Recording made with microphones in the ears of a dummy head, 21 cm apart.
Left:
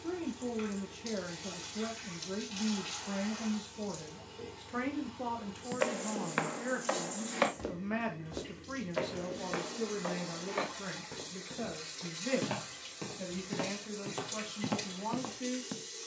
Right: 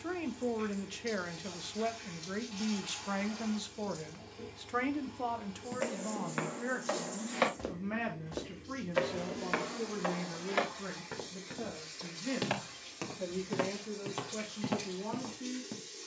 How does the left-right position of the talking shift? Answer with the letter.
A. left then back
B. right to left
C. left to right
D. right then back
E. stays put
B.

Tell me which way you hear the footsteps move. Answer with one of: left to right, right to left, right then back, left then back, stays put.
right then back.